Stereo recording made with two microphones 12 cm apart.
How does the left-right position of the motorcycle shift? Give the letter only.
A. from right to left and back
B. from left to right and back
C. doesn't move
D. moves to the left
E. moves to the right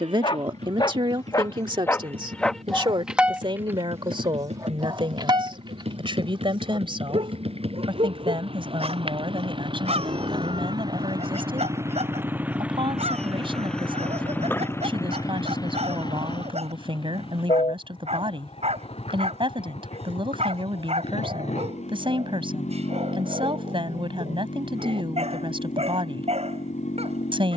D.